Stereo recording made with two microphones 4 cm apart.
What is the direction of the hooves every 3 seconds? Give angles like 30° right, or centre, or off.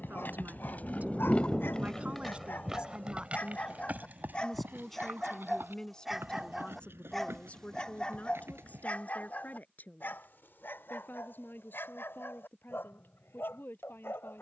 20° left, 50° right, 70° right, off, off.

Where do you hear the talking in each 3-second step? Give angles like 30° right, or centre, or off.
30° right, centre, 30° left, 50° left, 60° left.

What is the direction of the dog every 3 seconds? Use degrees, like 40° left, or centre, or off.
60° left, 20° left, 10° left, 60° left, 70° left.